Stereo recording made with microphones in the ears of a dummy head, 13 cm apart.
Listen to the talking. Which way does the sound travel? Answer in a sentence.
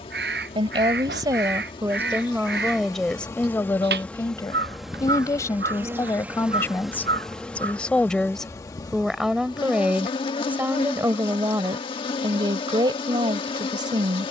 In this clip you hear the talking go left and come back.